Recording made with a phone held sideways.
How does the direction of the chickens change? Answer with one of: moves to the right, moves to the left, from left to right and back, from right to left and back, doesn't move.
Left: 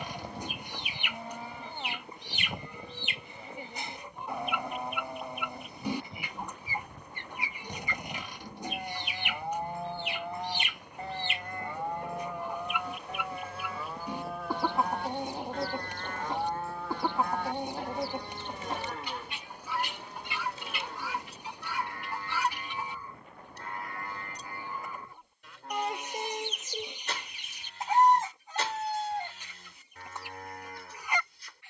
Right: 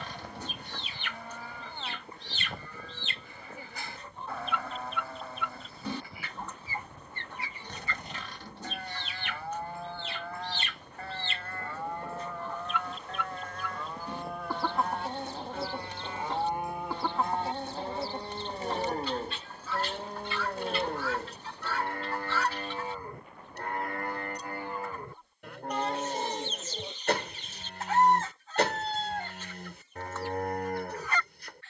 doesn't move.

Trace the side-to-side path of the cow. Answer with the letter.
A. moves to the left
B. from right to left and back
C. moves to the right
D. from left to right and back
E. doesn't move
C.